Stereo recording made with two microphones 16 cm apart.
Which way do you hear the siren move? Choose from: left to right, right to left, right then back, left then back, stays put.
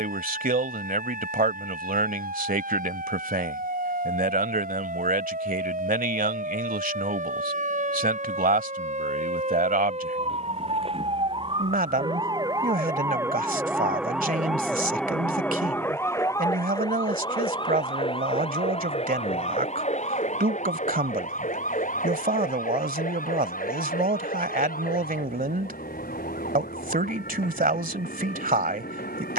right to left.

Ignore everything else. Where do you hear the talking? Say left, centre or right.
right.